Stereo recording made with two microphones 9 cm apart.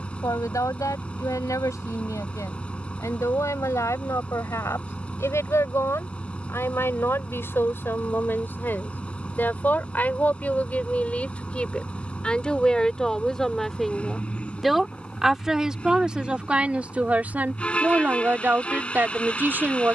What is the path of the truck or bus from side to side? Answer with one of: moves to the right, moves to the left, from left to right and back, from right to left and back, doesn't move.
doesn't move.